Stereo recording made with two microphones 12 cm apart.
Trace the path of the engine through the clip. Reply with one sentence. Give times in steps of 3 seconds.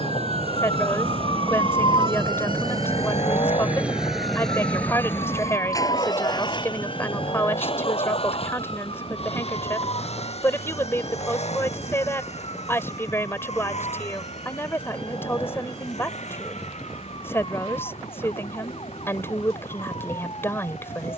You can hear the engine on the right from 0 s, in the centre from 3 s and on the left from 6 s.